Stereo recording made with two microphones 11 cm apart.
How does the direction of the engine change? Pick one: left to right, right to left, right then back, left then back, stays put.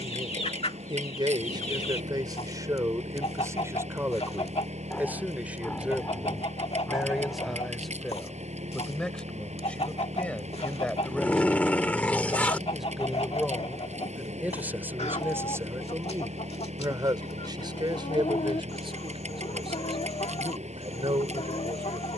stays put.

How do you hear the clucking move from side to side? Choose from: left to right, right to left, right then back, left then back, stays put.
stays put.